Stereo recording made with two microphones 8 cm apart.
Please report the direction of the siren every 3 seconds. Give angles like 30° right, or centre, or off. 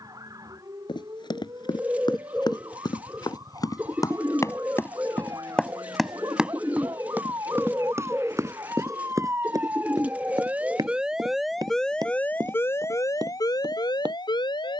50° right, 50° right, 40° right, 20° right, 50° left.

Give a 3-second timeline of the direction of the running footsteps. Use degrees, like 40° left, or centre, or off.
70° left, 30° left, 30° right, 50° right, 60° right.